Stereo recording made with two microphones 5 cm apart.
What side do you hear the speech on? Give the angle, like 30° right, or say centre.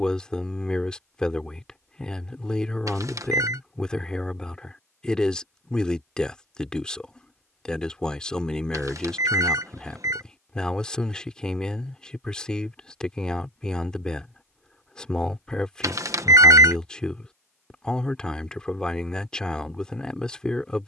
10° left.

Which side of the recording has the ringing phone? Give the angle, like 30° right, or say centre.
80° right.